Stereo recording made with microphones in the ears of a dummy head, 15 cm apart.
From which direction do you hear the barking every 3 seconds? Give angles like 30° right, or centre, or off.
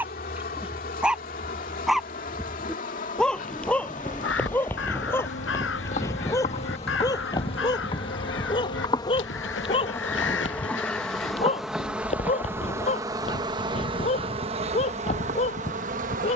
centre, 10° left, 20° left, 30° left, 40° left, 40° left.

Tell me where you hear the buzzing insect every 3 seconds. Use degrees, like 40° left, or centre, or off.
50° left, 50° left, 30° left, 10° left, 30° right, 50° right.